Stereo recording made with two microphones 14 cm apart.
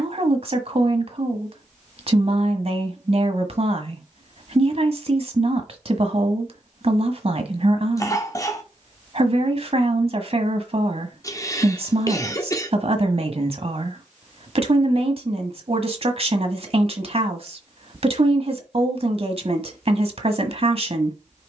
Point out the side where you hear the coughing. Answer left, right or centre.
left.